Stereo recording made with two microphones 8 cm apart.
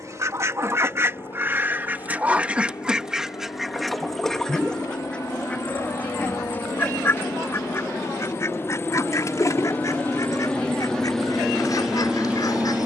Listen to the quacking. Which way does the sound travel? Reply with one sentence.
In this clip you hear the quacking move to the left.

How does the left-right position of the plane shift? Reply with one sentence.
You can hear the plane go from the left side to the right.